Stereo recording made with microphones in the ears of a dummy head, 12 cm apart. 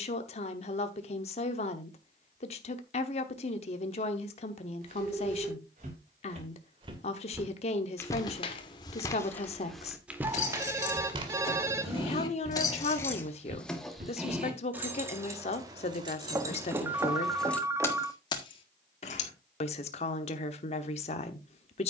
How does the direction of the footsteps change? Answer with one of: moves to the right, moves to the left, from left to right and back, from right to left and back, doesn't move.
from right to left and back.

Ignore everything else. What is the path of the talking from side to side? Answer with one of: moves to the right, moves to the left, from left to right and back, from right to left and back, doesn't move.
doesn't move.